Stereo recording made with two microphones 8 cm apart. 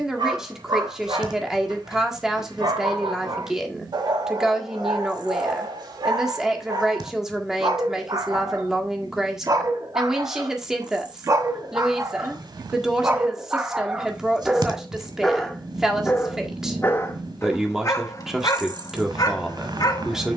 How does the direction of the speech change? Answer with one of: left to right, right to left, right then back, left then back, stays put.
stays put.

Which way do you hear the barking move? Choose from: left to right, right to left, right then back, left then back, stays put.
right to left.